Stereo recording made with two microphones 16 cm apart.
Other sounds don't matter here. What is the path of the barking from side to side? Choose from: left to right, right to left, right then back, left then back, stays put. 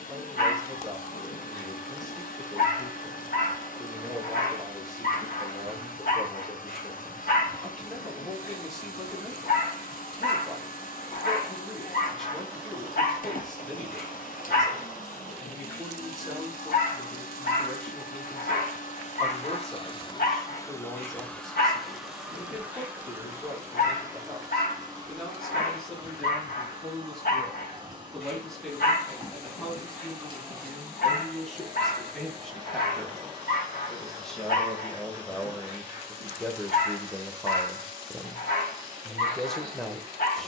stays put.